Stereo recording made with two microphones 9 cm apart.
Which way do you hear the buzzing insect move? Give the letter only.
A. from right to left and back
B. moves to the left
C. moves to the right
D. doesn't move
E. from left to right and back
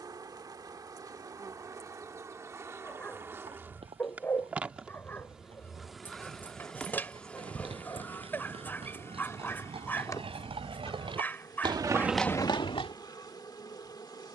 B.